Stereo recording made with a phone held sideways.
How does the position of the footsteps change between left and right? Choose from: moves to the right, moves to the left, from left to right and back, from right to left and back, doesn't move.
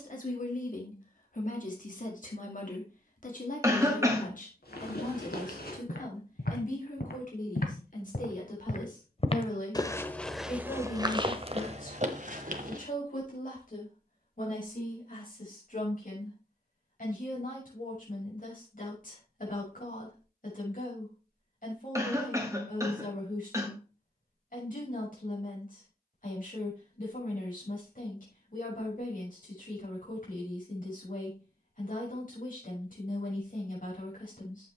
moves to the right.